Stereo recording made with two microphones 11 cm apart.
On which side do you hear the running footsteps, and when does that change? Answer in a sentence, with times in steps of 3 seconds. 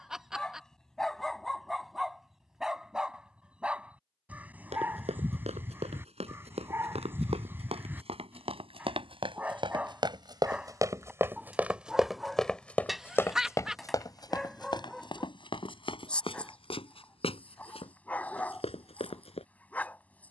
You can hear the running footsteps not at all from 0 s, on the right from 3 s and on the left from 12 s.